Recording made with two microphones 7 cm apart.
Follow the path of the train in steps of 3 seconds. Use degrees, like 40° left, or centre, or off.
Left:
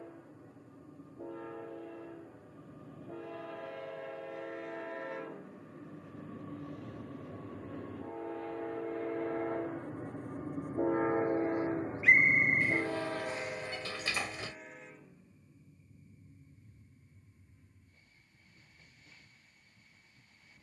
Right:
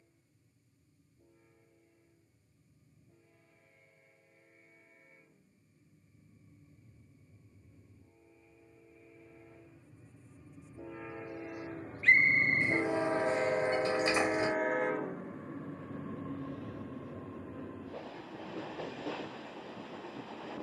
80° left, 80° left, 70° left, 50° left, 30° right, 70° right, 80° right.